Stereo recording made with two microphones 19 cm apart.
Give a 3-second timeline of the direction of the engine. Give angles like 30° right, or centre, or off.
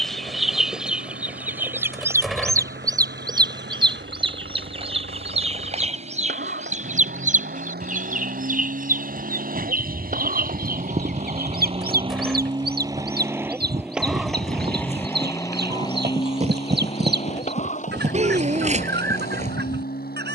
70° right, 70° right, 60° right, 40° right, 10° right, 30° left, 50° left.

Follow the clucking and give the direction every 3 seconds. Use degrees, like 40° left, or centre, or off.
10° right, 30° right, 40° right, 50° right, 60° right, 60° right, 60° right.